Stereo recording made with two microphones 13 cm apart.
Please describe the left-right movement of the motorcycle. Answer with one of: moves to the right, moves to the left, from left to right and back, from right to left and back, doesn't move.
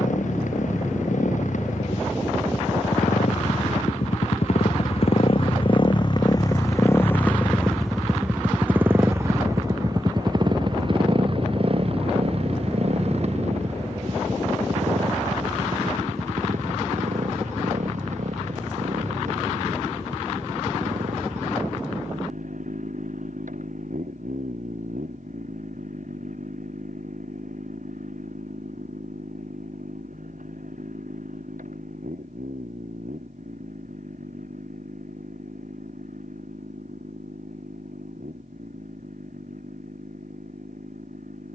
moves to the right.